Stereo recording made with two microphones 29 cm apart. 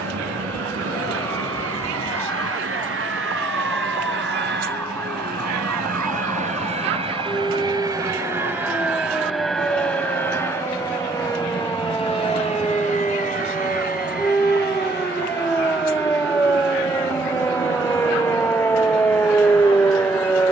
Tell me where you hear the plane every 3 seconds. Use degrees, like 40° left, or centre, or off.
60° right, 40° right, 20° right, 10° left, 30° left, 40° left, 40° left.